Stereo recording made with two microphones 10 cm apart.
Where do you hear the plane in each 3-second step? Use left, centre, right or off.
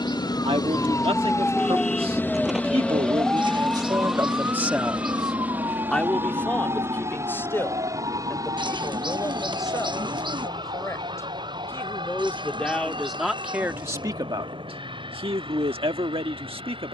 left, centre, right, right, right, right.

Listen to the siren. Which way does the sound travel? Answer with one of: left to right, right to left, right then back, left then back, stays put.
left to right.